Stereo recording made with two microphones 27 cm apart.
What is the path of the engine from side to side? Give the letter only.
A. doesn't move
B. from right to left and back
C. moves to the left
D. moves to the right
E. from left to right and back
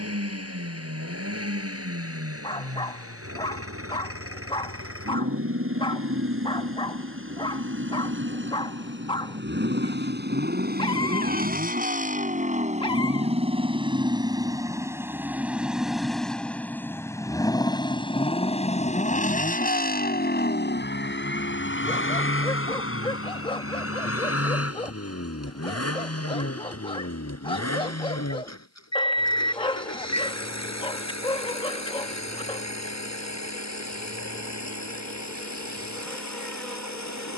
C.